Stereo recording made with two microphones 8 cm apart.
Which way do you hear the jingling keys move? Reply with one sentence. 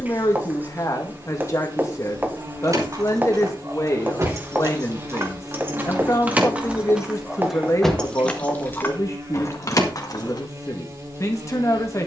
In this clip you hear the jingling keys go from the right side to the left.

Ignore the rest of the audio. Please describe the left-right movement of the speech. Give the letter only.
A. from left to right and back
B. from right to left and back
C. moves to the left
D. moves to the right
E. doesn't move
E.